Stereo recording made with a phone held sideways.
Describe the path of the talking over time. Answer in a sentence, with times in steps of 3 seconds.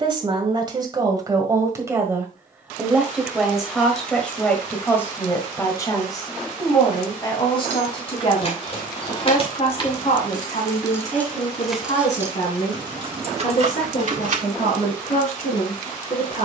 In this clip you hear the talking on the right from 0 s, in the centre from 3 s and on the left from 6 s.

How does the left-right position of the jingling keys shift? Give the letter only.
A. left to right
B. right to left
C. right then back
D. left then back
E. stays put
A.